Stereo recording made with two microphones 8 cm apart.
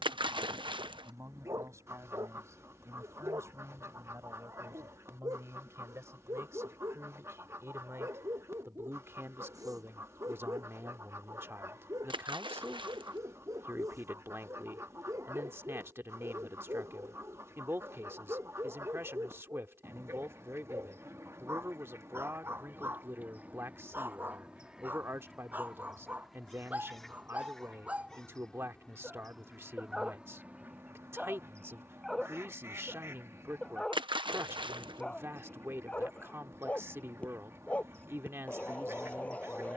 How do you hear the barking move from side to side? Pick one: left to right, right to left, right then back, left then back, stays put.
right to left.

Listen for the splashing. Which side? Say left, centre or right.
right.